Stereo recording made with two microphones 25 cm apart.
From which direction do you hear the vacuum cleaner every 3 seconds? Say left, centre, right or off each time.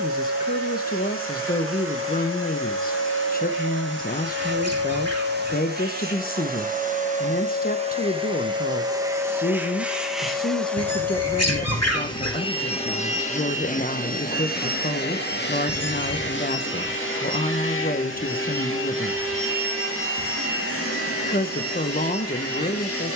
right, right, right, centre, left, left, left, left.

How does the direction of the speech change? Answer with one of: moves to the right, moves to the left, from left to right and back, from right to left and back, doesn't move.
doesn't move.